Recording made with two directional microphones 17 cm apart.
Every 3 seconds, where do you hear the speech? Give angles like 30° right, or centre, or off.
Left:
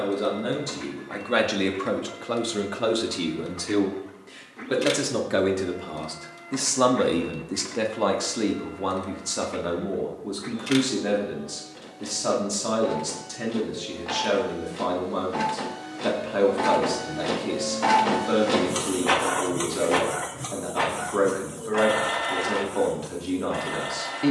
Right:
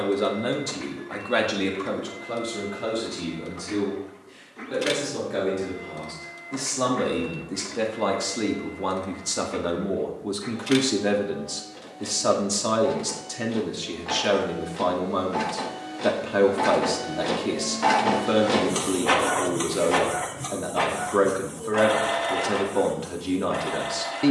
10° left, 60° left, 20° left, 10° right, 20° right, 20° right, 20° right, 20° right.